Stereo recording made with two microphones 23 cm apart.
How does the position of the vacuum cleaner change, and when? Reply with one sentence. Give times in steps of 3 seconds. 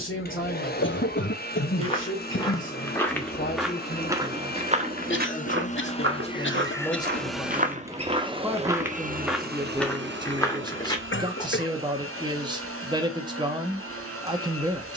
You can hear the vacuum cleaner on the left from 0 s, in the centre from 6 s and on the right from 9 s.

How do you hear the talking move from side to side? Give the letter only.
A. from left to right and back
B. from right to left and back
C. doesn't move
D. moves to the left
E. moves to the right
E.